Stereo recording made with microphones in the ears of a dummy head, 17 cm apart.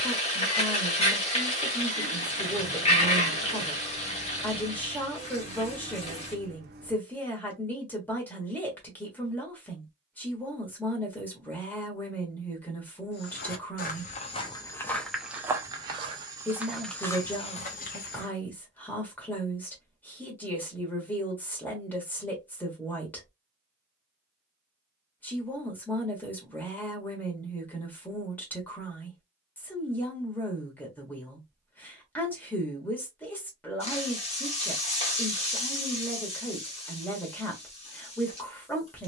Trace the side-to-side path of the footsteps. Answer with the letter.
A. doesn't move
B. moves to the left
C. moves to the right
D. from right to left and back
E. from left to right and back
E.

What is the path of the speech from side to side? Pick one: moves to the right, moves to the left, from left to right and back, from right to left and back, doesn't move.
doesn't move.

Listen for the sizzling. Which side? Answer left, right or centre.
left.